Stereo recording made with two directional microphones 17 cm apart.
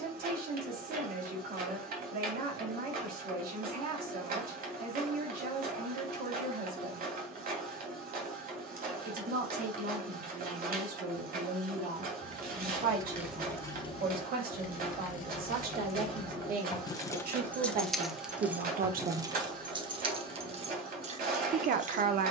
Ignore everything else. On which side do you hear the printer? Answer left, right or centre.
right.